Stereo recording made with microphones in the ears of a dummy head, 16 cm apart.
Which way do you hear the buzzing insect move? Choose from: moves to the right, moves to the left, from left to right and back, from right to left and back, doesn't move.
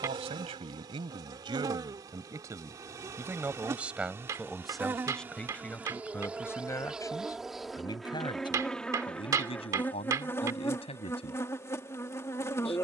moves to the left.